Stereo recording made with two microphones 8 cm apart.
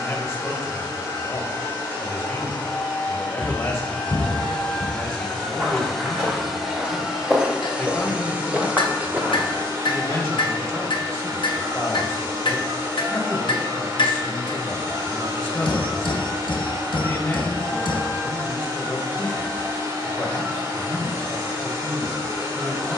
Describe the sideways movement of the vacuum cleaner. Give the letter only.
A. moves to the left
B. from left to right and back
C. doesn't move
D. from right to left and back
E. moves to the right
E.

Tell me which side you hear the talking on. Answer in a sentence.
In this clip you hear the talking on the left.